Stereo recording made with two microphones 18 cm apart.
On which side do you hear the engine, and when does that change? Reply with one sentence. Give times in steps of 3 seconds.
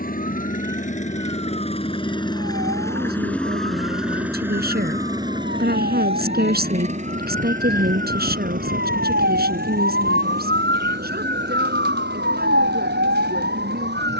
You can hear the engine on the left from 0 s, in the centre from 3 s and on the right from 6 s.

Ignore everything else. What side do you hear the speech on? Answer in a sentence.
You can hear the speech on the right.